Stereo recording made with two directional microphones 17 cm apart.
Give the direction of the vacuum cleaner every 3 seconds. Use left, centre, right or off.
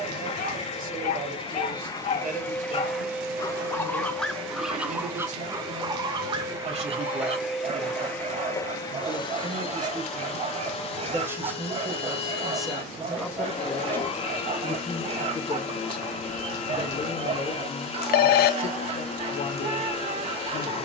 left, right, centre, left, left, left, left.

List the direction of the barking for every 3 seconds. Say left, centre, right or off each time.
left, centre, right, right, right, right, right.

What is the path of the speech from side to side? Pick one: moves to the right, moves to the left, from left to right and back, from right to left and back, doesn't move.
moves to the left.